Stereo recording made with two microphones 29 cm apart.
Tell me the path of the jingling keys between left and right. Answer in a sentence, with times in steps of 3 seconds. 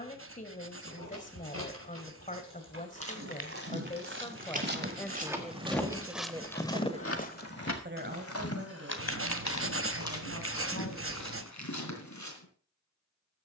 You can hear the jingling keys on the right from 0 s, on the left from 6 s and not at all from 9 s.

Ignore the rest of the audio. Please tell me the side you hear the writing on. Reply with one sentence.
You can hear the writing on the right.